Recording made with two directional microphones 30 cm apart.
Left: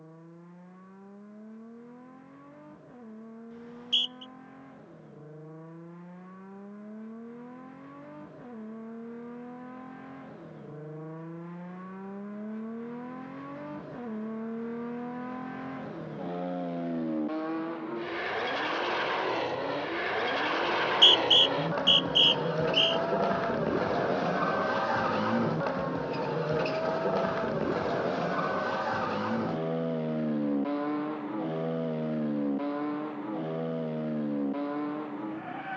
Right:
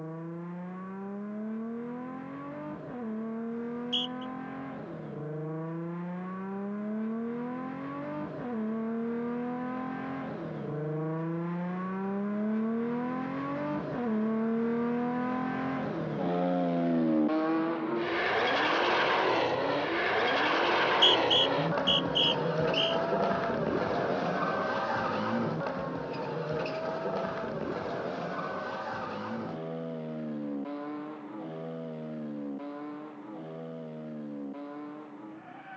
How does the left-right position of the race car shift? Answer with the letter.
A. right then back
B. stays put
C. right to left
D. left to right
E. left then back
C.